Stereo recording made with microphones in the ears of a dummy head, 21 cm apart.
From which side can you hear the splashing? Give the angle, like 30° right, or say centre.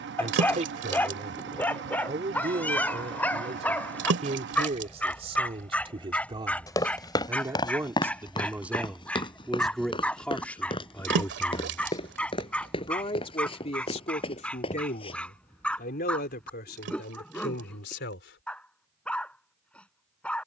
50° right.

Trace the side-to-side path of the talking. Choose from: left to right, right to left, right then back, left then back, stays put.
right to left.